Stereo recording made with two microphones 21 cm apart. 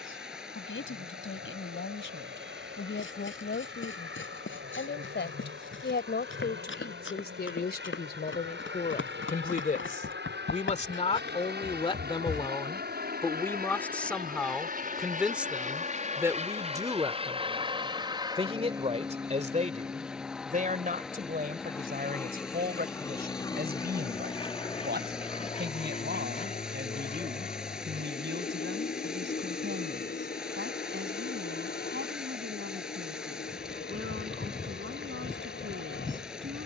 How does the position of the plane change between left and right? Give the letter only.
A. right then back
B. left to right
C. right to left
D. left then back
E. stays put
C.